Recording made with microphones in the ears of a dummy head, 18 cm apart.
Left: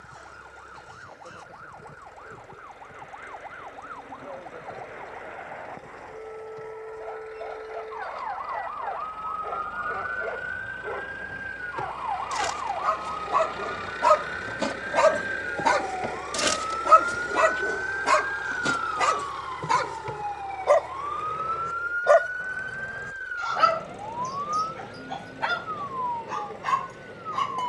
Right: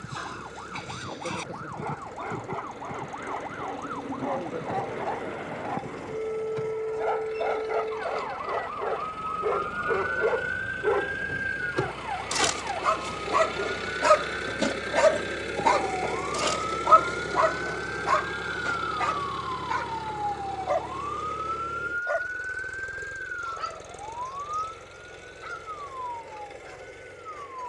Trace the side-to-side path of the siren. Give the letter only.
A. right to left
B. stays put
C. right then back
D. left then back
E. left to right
A.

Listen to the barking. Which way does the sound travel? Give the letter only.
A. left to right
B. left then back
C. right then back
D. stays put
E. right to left
E.